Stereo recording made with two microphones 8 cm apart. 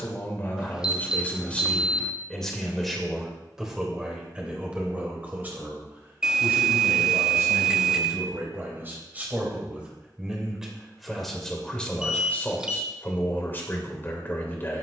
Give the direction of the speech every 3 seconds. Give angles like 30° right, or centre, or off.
20° left, 10° right, 30° right, 10° right, 30° left.